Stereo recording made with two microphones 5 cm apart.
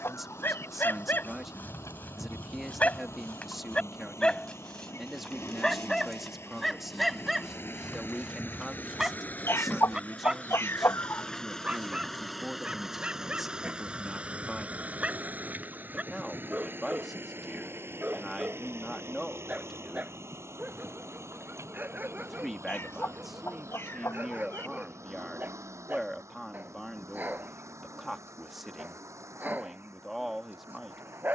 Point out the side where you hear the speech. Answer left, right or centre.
centre.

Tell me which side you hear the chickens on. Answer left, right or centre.
left.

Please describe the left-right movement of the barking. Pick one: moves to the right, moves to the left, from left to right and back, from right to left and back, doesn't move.
moves to the right.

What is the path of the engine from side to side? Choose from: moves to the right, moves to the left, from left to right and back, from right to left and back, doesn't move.
moves to the right.